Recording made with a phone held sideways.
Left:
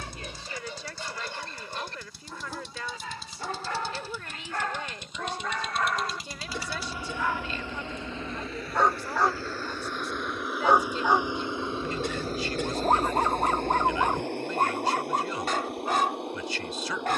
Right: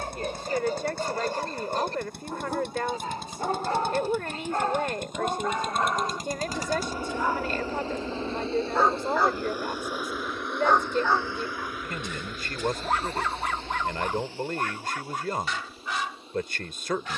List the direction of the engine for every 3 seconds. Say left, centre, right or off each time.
right, right, right, centre, left, left.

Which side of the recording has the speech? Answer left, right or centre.
right.